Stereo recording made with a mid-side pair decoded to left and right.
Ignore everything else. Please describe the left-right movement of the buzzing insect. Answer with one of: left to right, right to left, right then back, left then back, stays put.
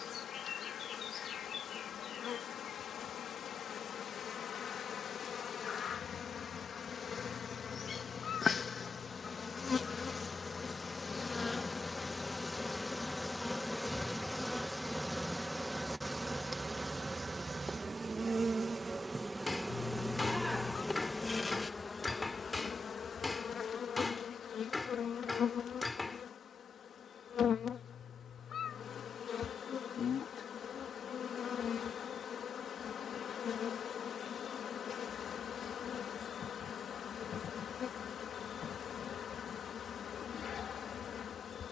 right then back.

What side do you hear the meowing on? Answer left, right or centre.
left.